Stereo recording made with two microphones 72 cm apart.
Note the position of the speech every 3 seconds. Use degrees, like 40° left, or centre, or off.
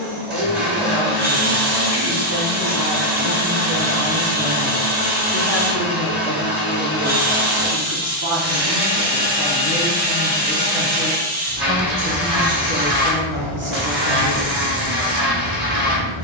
40° right, 10° right, 20° left, centre, 20° right, off.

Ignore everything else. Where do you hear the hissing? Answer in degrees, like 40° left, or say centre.
40° right.